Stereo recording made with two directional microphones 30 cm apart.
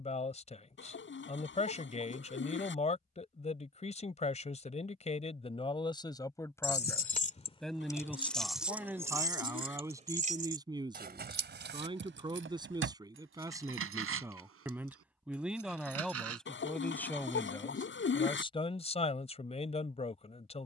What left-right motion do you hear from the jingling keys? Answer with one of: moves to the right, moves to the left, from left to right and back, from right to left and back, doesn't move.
moves to the right.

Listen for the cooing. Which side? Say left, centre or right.
left.